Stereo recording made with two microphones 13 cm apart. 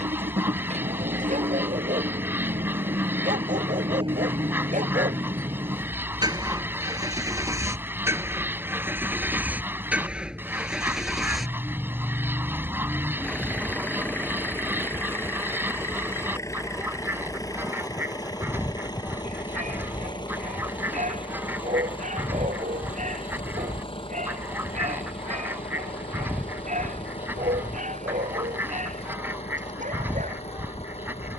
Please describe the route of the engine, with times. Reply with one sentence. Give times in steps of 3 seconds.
In this clip you hear the engine on the right from 0 s, in the centre from 9 s and on the left from 15 s.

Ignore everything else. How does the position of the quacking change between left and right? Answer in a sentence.
In this clip you hear the quacking stay in one place.